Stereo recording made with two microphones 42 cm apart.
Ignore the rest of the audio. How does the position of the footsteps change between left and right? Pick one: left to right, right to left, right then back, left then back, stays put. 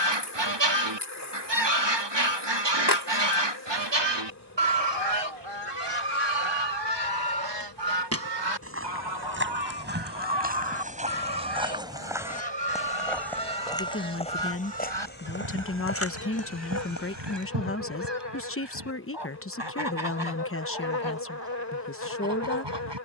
right to left.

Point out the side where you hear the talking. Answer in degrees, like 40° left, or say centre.
30° left.